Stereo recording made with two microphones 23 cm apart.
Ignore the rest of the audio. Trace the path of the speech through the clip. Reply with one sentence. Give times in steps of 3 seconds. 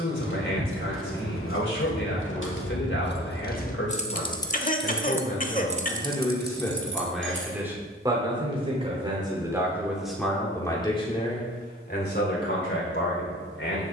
In this clip you hear the speech on the left from 0 s, in the centre from 6 s and on the left from 12 s.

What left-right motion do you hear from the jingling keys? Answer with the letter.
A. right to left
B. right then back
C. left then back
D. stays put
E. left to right
E.